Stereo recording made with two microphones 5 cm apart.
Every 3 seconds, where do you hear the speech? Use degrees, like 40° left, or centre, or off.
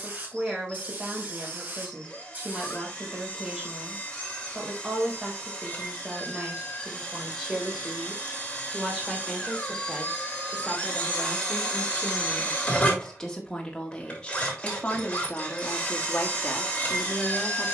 20° right, 20° right, 10° right, centre, 10° left, 30° left.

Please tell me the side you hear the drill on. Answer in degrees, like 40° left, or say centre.
20° left.